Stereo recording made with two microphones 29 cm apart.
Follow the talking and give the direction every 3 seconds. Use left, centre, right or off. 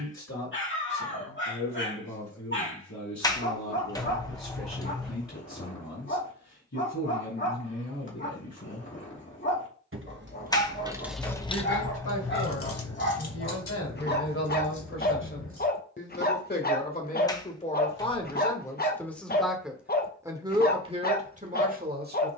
left, left, left, left, left, left, centre, right.